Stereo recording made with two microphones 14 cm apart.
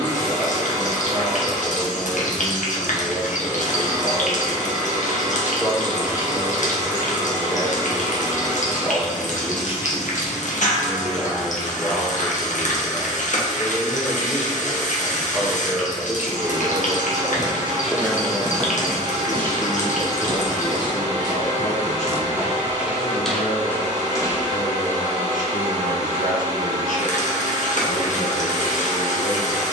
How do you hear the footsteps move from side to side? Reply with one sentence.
You can hear the footsteps move from left to right and back again.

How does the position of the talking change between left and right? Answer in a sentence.
In this clip you hear the talking go from the right side to the left.